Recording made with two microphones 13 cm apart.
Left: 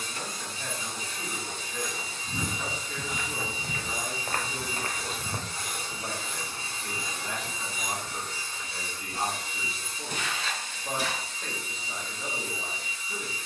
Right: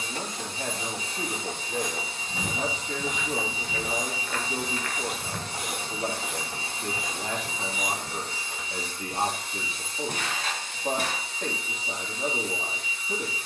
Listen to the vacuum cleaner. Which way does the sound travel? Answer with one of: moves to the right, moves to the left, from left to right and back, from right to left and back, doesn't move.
doesn't move.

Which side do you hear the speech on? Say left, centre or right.
right.